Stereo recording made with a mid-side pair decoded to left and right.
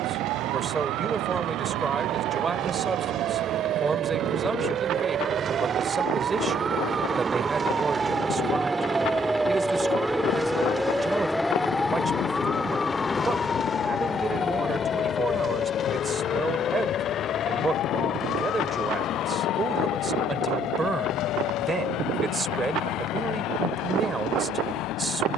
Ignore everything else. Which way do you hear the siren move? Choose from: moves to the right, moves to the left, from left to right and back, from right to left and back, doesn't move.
moves to the left.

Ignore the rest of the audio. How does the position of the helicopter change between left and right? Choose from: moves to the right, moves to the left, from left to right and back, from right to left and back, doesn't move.
moves to the left.